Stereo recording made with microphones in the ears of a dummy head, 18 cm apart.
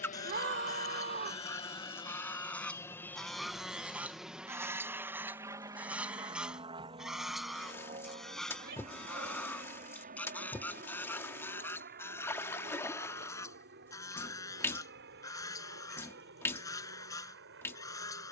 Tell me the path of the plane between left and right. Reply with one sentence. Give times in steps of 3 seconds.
In this clip you hear the plane on the left from 0 s, in the centre from 3 s and on the right from 6 s.